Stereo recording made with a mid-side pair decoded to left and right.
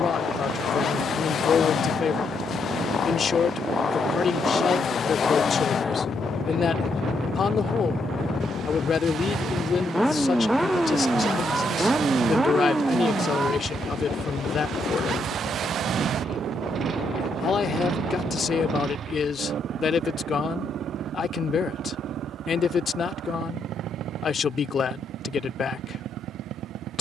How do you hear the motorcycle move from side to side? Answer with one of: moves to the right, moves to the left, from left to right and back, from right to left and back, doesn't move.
moves to the right.